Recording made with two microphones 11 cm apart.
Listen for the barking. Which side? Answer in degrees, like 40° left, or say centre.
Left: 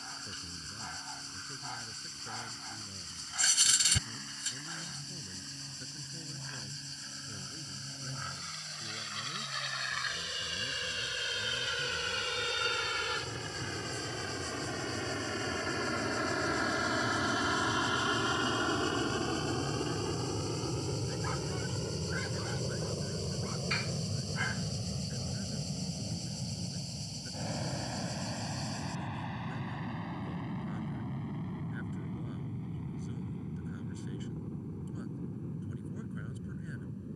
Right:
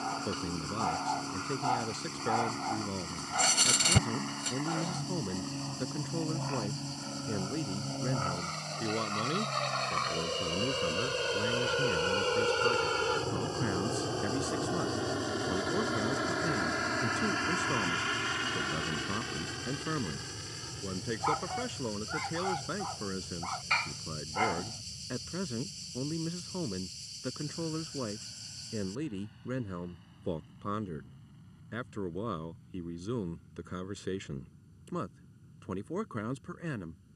60° right.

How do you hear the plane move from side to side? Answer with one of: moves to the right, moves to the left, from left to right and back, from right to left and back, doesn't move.
moves to the left.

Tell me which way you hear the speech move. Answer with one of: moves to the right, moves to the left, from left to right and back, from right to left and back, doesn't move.
doesn't move.